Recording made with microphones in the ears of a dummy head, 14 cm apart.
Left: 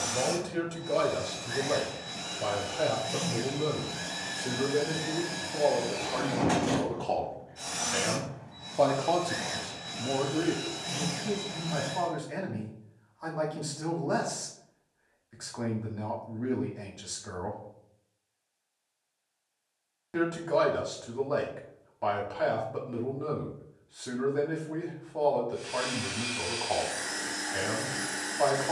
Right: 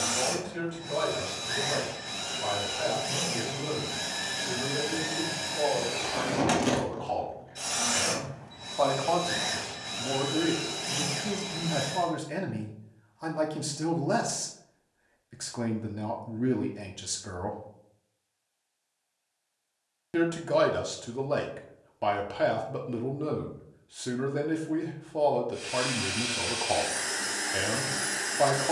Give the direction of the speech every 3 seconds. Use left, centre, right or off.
left, left, left, centre, right, right, right, right, right, right.